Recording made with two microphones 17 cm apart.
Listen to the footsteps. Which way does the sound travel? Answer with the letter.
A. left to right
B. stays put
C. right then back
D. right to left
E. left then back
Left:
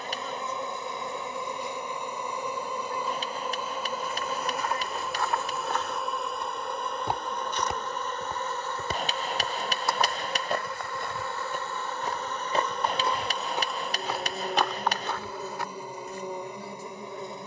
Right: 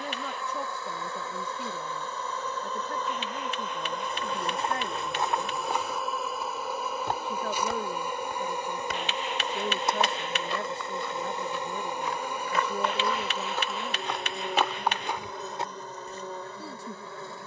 E.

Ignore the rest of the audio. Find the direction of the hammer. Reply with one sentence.
You can hear the hammer on the left.